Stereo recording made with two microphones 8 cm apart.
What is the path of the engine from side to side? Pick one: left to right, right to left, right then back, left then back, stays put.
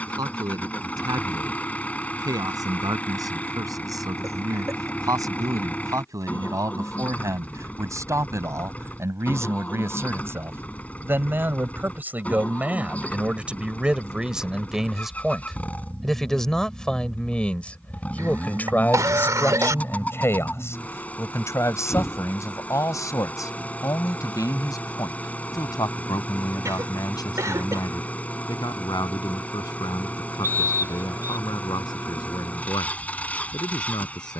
stays put.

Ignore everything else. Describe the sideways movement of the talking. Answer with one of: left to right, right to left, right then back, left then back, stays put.
right to left.